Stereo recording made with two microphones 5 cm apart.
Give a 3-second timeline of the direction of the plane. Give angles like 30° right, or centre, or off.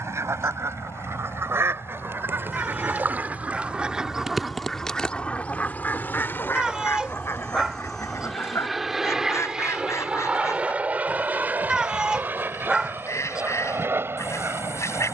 70° left, 50° left, 10° left, 20° right, 40° right.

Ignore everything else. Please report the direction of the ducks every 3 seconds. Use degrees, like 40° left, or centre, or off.
60° right, centre, 60° left, 70° left, 70° left.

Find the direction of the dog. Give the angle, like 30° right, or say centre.
10° right.